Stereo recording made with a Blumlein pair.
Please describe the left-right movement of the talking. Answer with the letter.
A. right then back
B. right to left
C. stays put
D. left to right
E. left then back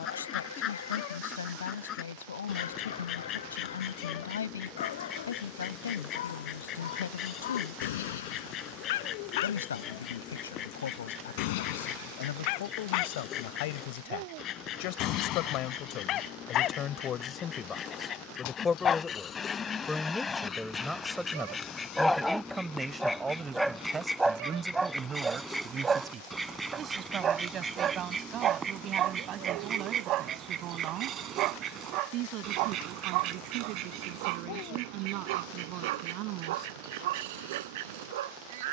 D.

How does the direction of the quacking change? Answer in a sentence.
You can hear the quacking move to the right.